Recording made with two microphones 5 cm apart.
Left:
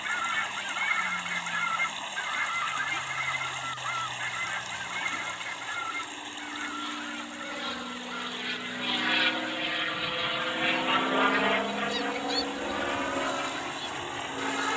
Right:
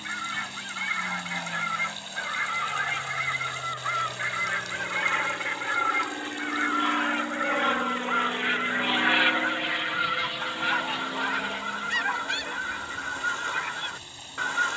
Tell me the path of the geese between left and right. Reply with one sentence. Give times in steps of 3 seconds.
You can hear the geese in the centre from 0 s and on the right from 3 s.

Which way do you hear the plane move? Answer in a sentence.
In this clip you hear the plane move to the left.